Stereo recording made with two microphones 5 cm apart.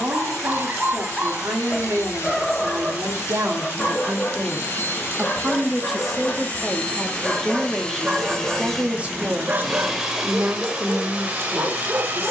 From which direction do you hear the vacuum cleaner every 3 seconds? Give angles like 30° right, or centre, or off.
60° left, 50° left, 20° left, 20° right.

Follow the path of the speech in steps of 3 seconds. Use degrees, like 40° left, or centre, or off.
60° right, 40° right, centre, 50° right.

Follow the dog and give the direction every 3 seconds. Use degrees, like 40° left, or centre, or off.
20° right, 30° left, centre, 40° right.